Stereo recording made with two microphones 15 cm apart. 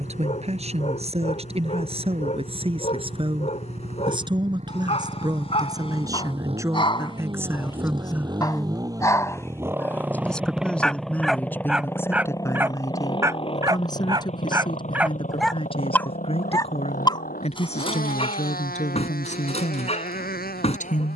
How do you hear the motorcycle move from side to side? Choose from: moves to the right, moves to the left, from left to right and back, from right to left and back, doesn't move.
moves to the left.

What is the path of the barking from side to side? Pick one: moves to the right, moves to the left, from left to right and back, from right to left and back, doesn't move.
from left to right and back.